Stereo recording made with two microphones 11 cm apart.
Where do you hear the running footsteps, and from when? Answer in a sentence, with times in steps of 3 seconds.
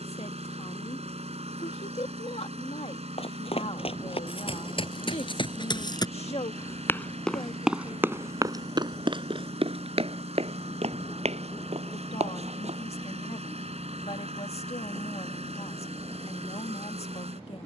You can hear the running footsteps not at all from 0 s, on the left from 3 s, in the centre from 6 s, on the right from 9 s and not at all from 15 s.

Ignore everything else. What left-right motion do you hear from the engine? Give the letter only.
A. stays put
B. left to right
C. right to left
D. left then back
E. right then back
A.